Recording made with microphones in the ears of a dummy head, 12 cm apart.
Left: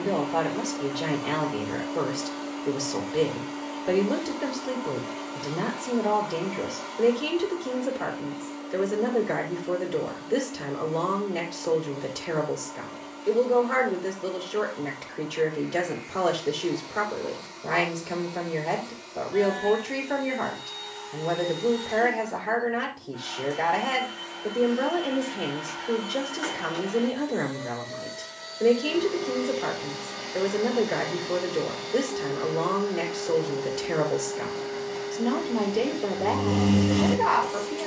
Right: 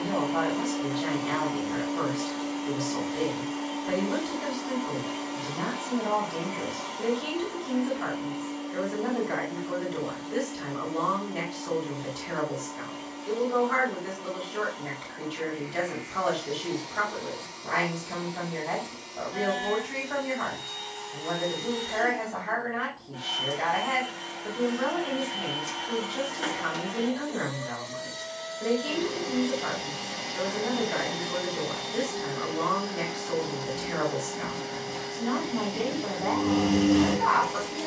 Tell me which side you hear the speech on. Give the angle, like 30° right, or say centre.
60° left.